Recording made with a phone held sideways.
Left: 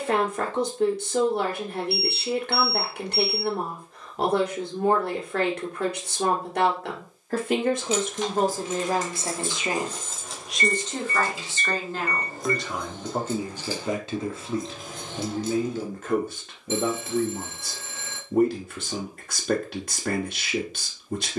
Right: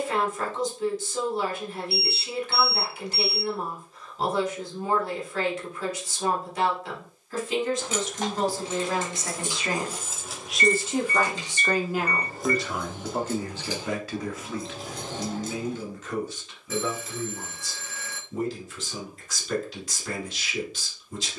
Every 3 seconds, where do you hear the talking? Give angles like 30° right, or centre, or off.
70° left, 70° left, 60° left, centre, 10° left, 60° left, 60° left.